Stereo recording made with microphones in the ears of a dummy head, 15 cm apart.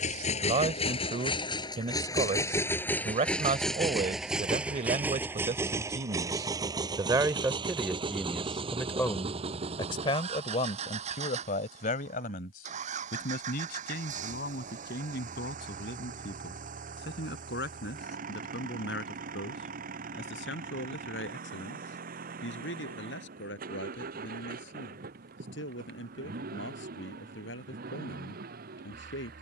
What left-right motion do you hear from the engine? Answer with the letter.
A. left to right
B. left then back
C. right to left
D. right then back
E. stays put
A.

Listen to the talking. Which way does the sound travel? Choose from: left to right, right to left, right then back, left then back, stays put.
right to left.